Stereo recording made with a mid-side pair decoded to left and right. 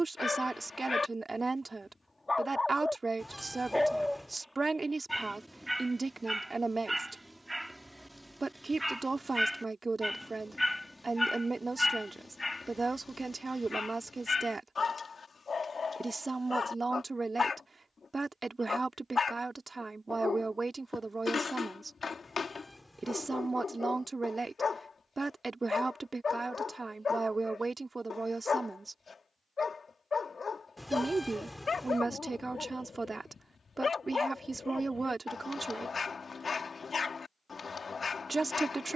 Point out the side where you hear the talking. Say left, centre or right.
right.